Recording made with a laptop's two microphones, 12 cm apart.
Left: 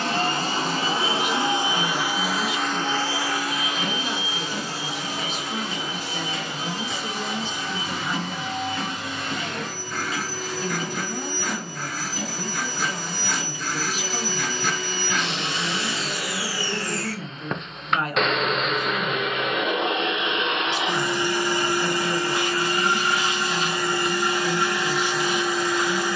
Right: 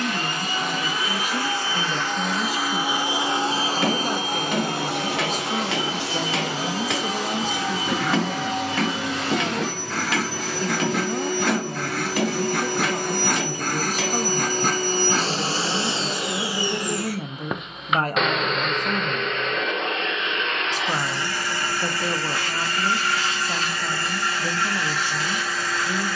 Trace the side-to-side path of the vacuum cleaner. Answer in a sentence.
You can hear the vacuum cleaner go right and come back.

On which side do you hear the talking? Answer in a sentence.
You can hear the talking on the right.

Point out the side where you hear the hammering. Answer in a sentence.
In this clip you hear the hammering on the right.